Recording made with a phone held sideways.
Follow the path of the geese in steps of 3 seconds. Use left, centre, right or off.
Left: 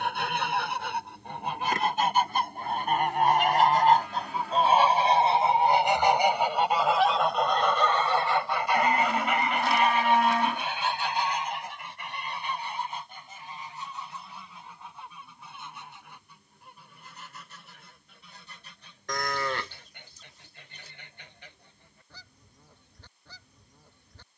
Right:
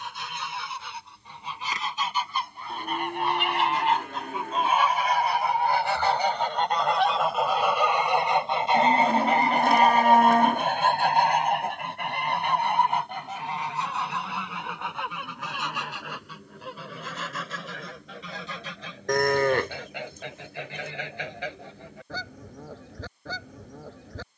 left, left, centre, right, right, right, right, right.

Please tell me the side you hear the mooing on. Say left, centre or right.
right.